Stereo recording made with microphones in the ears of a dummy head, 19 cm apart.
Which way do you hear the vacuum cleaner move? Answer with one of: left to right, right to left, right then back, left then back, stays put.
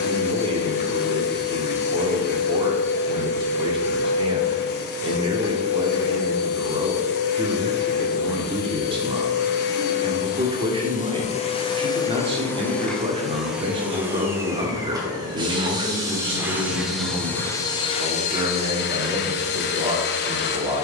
right then back.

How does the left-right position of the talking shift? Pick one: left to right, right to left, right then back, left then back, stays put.
stays put.